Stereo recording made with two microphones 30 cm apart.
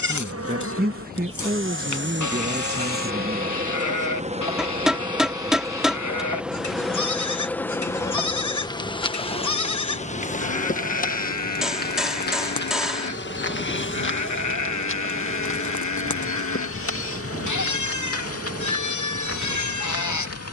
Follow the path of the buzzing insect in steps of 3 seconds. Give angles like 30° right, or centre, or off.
40° right, 20° right, 10° left, 30° left, 40° left, 50° left, 50° left.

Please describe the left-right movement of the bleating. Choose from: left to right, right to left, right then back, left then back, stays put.
stays put.